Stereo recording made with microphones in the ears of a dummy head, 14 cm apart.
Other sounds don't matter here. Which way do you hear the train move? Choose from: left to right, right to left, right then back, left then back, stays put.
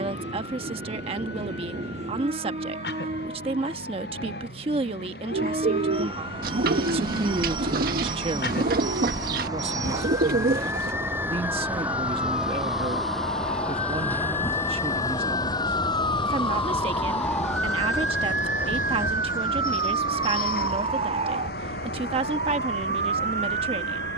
right to left.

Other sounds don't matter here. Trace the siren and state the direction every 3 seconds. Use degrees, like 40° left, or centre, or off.
80° left, 80° left, 70° left, 60° left, 50° left, 20° left, 20° right, 50° right.